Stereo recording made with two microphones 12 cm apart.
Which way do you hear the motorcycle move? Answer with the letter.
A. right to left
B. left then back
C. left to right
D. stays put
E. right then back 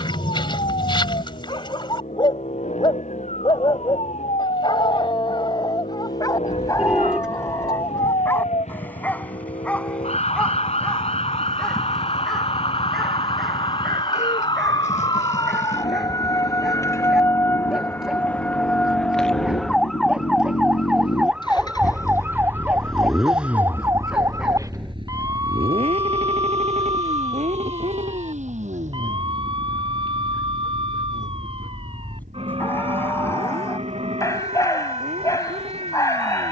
C.